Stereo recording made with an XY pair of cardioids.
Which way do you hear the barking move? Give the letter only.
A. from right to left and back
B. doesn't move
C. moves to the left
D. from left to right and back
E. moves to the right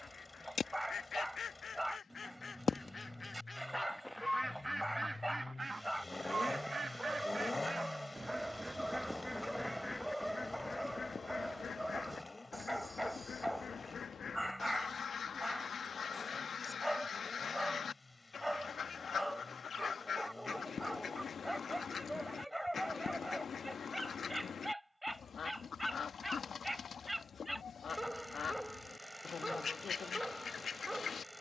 B.